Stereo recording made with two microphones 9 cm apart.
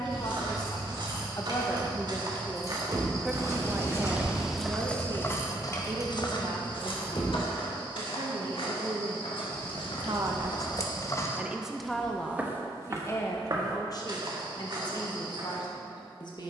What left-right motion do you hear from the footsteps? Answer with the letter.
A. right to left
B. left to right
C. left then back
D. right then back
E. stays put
C.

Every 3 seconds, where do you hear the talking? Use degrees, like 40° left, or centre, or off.
30° left, 30° right, 60° right, 30° right, 40° left, 50° left.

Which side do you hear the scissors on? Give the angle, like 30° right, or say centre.
40° left.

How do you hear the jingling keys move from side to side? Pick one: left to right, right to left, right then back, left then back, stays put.
right to left.